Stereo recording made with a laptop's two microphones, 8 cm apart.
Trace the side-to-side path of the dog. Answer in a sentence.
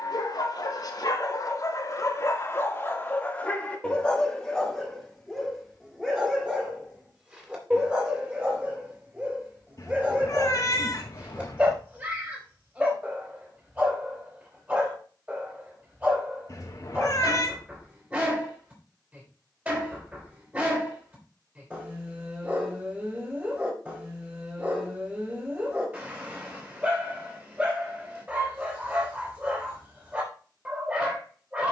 You can hear the dog travel towards the right.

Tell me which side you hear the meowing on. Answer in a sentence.
You can hear the meowing on the left.